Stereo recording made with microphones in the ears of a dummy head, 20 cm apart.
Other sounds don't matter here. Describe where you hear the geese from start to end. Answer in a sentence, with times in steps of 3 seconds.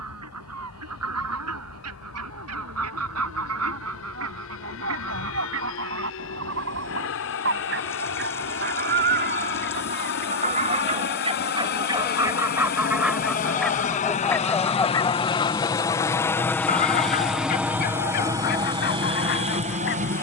You can hear the geese on the right from 0 s, in the centre from 12 s and on the left from 15 s.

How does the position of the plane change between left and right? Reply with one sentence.
In this clip you hear the plane travel towards the right.